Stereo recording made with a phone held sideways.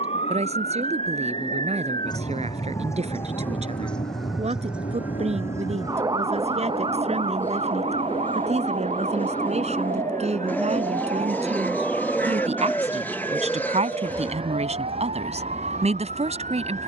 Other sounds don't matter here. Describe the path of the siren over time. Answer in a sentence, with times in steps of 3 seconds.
In this clip you hear the siren on the left from 0 s, in the centre from 3 s and on the right from 6 s.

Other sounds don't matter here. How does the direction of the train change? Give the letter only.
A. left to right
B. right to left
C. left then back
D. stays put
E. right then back
A.